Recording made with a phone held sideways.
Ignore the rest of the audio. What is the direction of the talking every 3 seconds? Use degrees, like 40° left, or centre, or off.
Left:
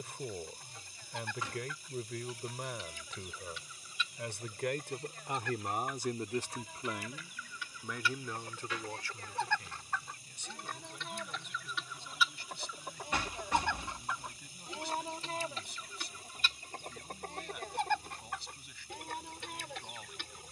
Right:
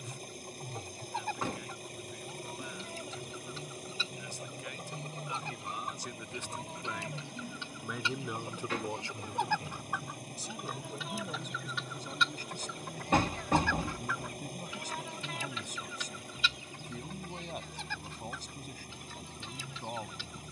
80° left, 70° left, 10° left, 40° right, 50° right, 50° right, 50° right.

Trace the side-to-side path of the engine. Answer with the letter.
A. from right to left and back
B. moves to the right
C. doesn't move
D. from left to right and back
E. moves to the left
C.